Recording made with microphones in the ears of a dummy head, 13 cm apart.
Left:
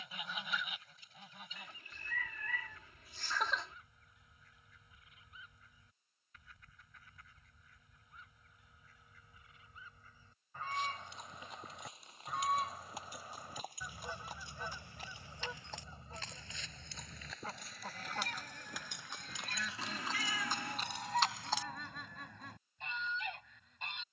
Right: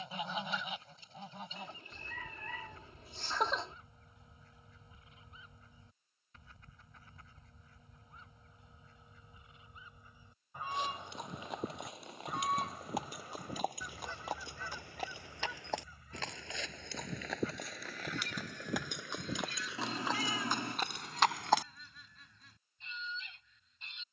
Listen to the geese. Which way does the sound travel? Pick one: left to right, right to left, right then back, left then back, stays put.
right to left.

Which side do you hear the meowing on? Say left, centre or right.
right.